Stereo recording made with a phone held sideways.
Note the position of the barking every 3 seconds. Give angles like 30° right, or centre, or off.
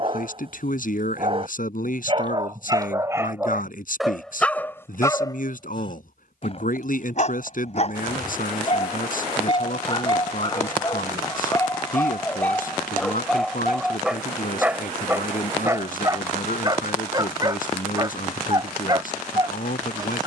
30° right, centre, 40° left, 30° left, centre, 20° right, 30° right.